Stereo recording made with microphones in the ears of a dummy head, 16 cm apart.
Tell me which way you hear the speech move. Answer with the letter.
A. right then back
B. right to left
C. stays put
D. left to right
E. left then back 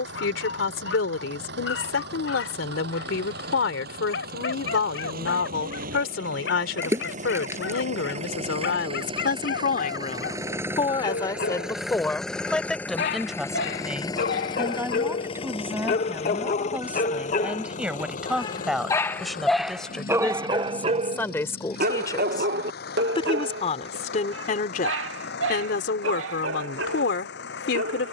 A.